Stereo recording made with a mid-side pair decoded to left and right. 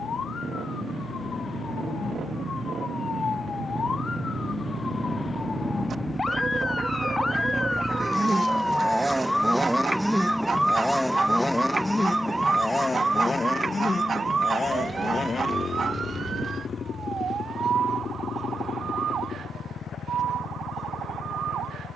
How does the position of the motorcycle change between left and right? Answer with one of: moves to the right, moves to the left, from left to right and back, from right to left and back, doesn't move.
moves to the left.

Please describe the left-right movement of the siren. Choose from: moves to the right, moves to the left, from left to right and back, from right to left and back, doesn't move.
moves to the right.